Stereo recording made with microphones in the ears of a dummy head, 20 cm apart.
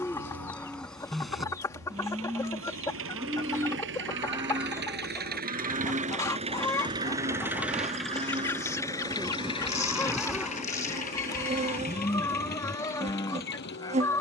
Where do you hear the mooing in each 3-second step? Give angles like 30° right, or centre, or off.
centre, 20° right, 30° right, centre, 20° left.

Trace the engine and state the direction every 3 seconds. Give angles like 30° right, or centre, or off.
70° right, 50° right, 10° right, 30° left, 50° left.